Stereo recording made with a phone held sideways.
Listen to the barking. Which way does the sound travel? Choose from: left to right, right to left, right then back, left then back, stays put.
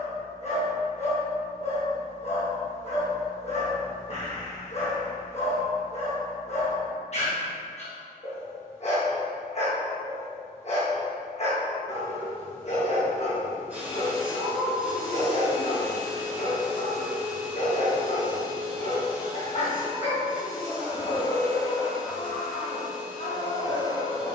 stays put.